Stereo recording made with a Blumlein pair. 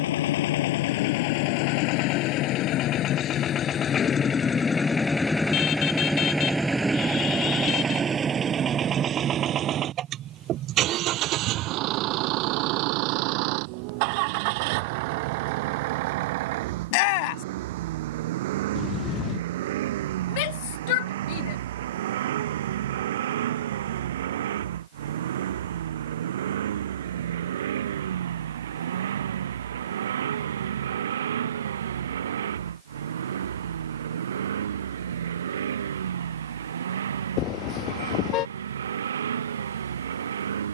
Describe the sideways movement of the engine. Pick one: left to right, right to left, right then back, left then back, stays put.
left to right.